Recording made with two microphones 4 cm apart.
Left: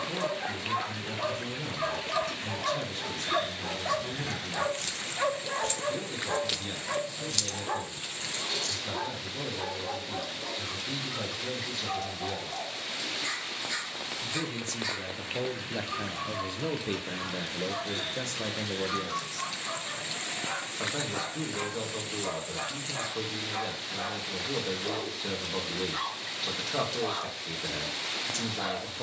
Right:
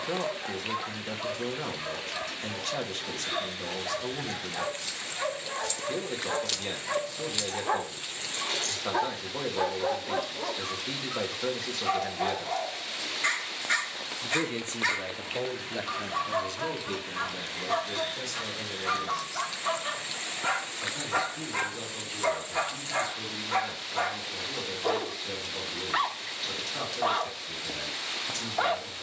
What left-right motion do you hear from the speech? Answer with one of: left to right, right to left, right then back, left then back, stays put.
right to left.